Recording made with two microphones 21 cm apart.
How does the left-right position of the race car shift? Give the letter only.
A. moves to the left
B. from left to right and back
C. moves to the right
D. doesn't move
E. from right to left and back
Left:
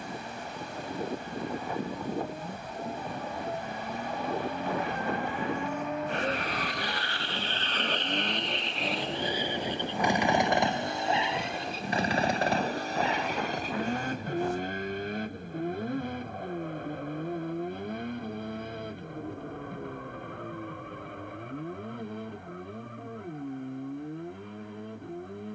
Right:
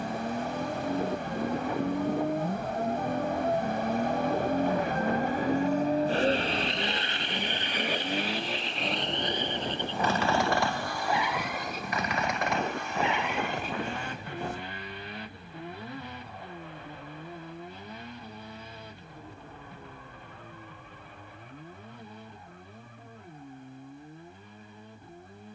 A.